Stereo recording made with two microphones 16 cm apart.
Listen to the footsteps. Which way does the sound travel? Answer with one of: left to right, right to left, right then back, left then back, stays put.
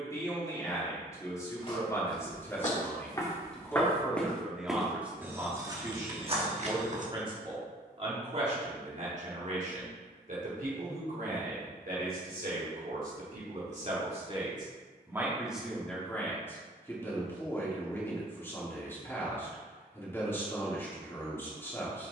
left to right.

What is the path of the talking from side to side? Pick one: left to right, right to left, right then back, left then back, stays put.
right then back.